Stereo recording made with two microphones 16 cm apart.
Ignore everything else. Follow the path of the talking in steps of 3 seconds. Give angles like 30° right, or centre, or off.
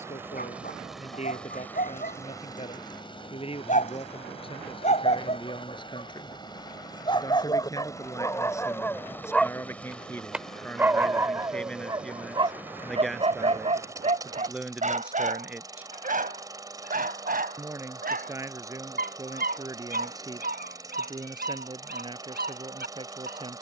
40° left, 30° left, 20° left, 10° left, centre, 10° right, 20° right, 30° right.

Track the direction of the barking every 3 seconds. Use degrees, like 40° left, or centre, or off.
60° left, 50° left, 20° left, 10° right, 40° right, 60° right, 70° right, 70° right.